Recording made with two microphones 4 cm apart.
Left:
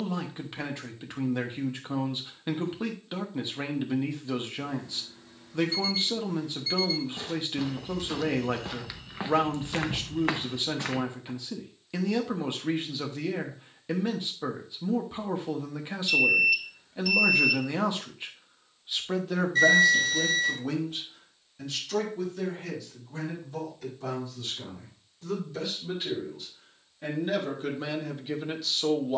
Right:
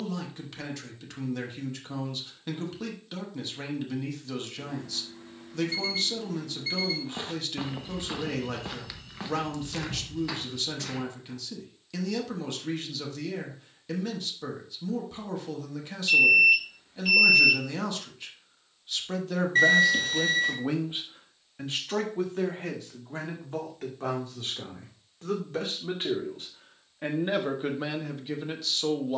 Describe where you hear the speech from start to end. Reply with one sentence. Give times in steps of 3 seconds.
In this clip you hear the speech on the left from 0 s, in the centre from 18 s, on the right from 21 s and in the centre from 27 s.